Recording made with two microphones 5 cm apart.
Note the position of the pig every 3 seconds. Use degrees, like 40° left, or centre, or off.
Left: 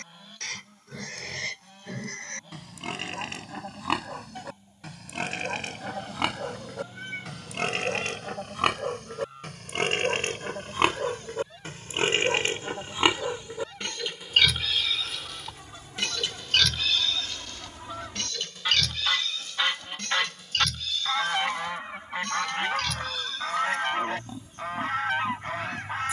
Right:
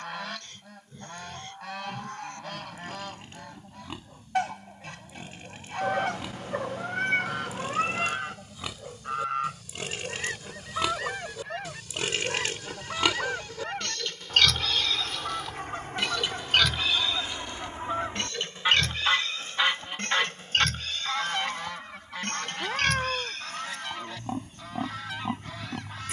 80° left, 80° left, 60° left, 50° left, 20° left, 10° right, 30° right, 40° right, 50° right.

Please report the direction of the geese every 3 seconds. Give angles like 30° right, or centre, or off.
70° right, 70° right, 70° right, 60° right, 60° right, 40° right, 10° right, 30° left, 40° left.